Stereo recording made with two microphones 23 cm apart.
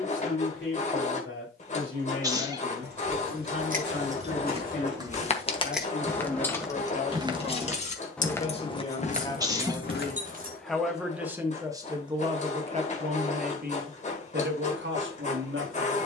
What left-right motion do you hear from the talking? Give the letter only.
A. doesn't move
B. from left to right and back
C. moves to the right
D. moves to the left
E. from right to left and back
C.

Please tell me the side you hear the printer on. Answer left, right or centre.
left.